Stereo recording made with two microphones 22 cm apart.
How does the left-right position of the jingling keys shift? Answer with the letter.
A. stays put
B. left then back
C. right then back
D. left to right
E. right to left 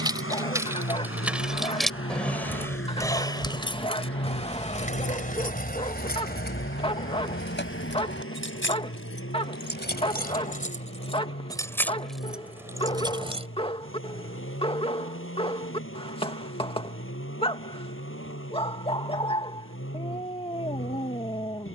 B.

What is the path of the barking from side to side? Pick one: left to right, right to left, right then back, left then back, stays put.
stays put.